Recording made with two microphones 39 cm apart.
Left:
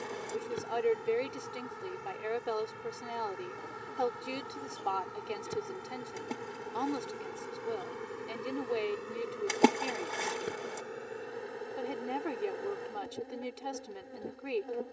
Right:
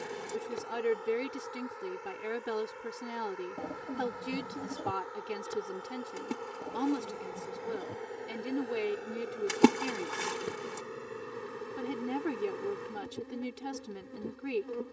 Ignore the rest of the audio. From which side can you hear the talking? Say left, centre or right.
right.